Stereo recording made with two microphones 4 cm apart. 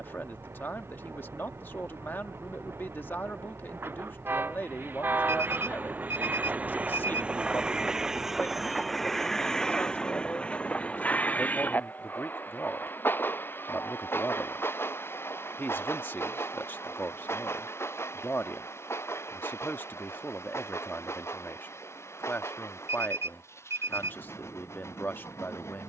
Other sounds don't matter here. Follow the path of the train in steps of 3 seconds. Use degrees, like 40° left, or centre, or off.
70° right, 50° right, 20° right, 20° left, 50° left, 60° left, 70° left, 70° left, 70° left.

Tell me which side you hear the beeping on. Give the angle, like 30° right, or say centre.
70° right.